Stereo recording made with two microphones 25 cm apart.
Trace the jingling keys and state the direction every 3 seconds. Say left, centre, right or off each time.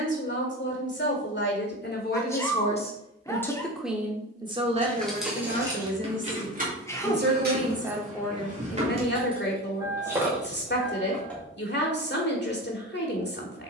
off, centre, right, centre, off.